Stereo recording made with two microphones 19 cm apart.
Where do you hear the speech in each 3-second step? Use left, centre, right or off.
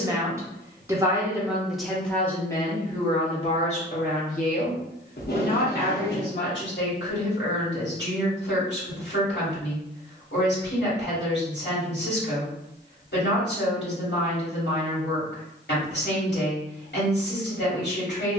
centre, left, left, left, left, left.